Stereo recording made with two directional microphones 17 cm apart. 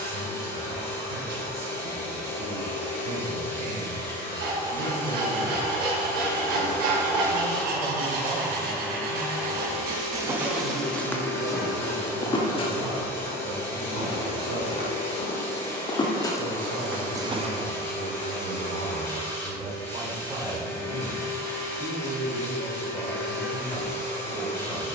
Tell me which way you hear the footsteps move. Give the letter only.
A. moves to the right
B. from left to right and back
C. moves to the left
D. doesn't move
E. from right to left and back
E.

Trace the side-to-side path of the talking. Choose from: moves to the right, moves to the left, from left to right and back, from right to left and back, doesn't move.
moves to the left.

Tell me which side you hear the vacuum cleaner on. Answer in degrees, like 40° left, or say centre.
10° left.